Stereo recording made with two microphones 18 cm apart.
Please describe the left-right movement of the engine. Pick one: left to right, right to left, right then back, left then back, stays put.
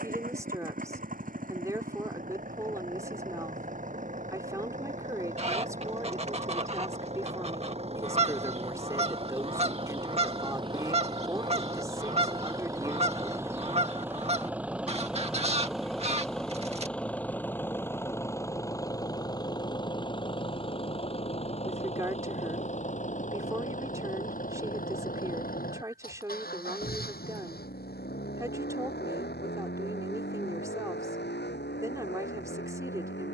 right to left.